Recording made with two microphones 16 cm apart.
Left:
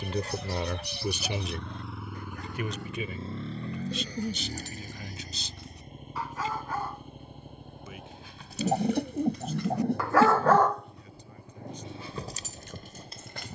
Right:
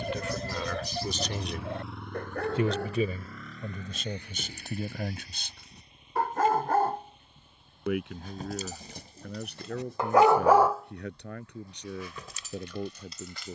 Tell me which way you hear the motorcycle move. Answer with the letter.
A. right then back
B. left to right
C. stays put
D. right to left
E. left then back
D.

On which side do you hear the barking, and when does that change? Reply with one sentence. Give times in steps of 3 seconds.
You can hear the barking on the right from 0 s, in the centre from 9 s and on the left from 12 s.